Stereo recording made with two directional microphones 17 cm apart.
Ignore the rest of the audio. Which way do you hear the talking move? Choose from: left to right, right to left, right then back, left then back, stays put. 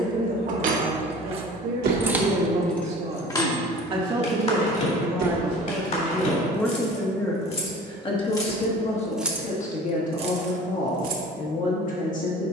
right to left.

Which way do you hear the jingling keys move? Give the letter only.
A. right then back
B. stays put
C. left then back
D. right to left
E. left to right
C.